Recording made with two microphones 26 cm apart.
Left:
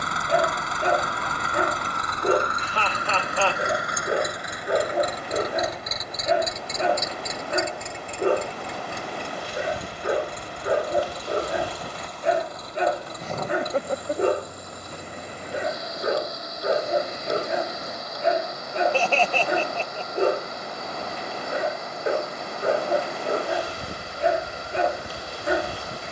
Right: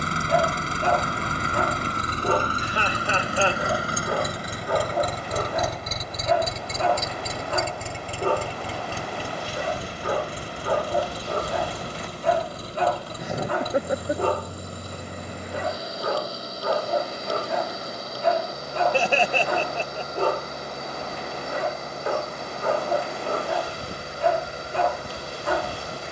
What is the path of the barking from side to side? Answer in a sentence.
In this clip you hear the barking stay in one place.